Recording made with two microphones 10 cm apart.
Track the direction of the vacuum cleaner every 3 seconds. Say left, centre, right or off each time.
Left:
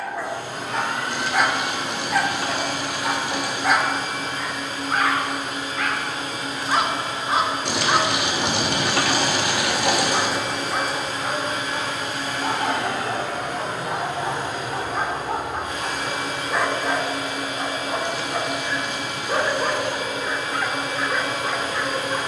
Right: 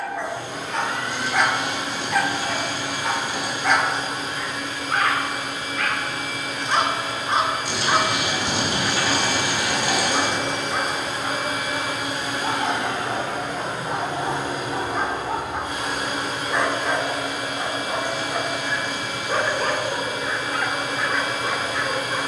left, left, left, centre, right, right, right, right.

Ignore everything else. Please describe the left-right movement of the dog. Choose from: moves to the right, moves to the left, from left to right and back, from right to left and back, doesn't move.
doesn't move.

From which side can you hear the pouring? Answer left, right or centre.
left.